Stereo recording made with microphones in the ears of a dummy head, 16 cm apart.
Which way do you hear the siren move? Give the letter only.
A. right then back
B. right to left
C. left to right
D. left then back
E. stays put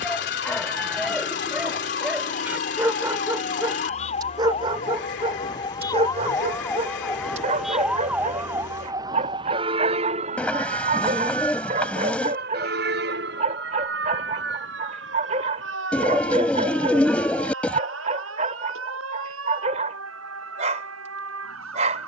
C.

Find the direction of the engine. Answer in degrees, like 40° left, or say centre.
70° left.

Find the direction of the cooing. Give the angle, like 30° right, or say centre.
10° left.